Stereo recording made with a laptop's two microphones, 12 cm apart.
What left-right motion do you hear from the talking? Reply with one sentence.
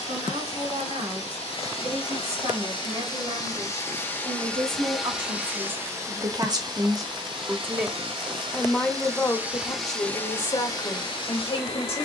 You can hear the talking move from right to left.